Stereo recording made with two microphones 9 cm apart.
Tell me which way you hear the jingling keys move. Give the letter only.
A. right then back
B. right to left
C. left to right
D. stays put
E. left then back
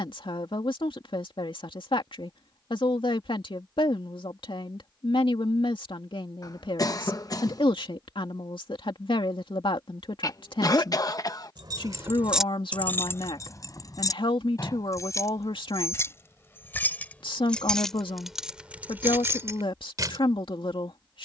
E.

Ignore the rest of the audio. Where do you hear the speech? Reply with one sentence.
In this clip you hear the speech on the left.